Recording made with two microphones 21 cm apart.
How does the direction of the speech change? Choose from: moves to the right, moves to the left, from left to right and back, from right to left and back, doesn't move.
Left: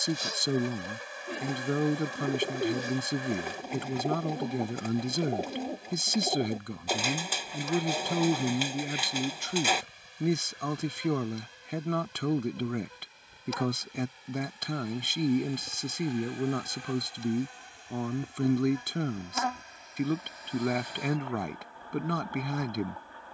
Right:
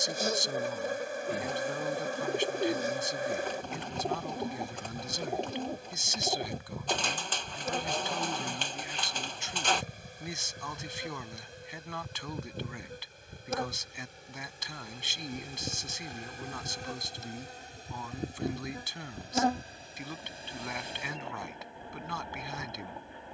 doesn't move.